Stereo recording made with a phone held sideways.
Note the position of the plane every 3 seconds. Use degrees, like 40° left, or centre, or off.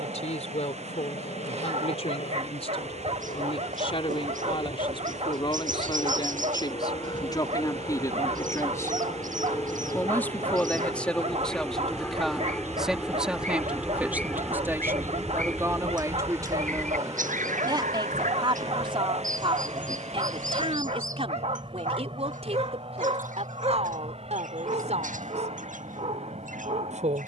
60° left, 50° left, 30° left, 20° left, centre, 20° right, 30° right, 40° right, 50° right.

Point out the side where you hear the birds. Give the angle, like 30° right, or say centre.
70° right.